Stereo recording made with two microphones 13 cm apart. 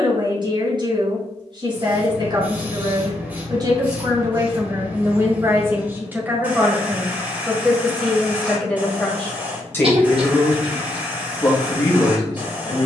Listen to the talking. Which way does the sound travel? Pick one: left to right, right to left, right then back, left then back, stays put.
right to left.